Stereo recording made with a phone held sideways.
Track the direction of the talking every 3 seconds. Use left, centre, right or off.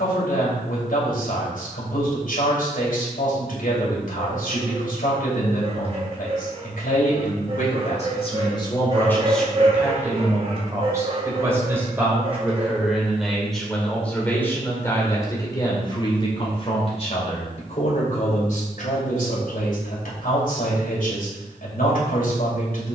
left, left, left, centre, centre, left, left, left.